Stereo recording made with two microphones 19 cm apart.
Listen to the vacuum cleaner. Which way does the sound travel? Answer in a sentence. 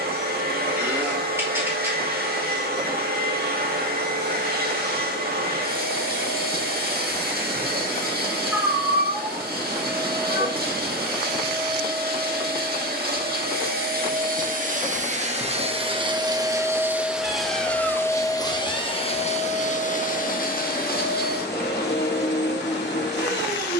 In this clip you hear the vacuum cleaner travel towards the left.